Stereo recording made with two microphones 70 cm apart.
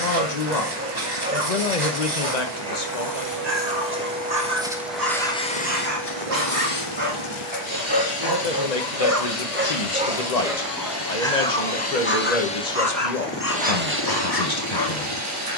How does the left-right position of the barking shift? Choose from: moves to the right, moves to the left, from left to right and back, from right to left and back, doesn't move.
moves to the left.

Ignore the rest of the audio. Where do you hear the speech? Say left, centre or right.
left.